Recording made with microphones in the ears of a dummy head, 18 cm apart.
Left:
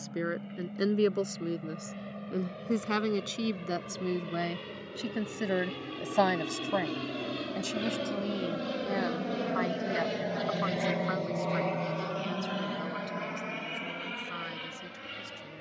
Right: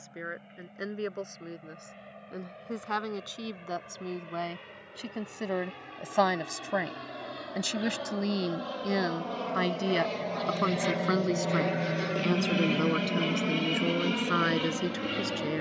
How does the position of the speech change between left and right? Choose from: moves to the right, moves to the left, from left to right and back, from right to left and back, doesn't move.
moves to the right.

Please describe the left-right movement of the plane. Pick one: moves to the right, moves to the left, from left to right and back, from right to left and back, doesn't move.
moves to the right.